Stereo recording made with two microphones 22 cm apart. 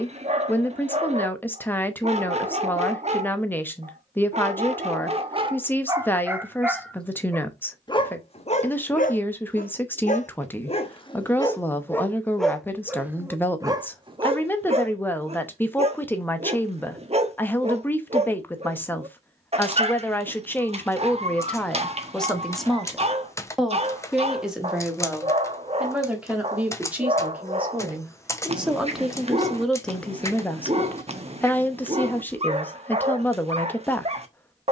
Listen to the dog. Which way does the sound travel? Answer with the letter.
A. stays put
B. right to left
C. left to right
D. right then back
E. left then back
E.